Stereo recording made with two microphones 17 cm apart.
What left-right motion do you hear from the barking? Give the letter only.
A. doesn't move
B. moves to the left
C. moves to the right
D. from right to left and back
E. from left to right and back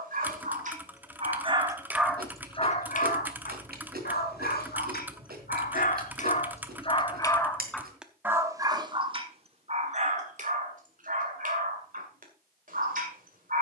D.